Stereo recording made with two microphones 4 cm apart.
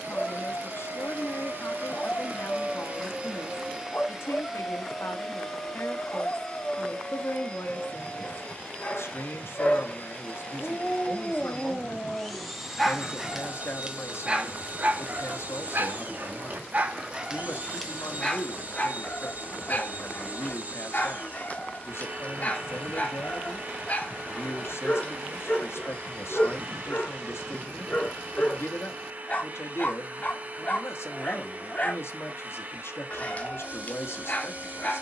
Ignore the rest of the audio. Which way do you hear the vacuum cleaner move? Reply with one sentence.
You can hear the vacuum cleaner go left and come back.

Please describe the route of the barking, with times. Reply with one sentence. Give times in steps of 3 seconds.
In this clip you hear the barking on the left from 0 s, in the centre from 12 s, on the right from 15 s and on the left from 18 s.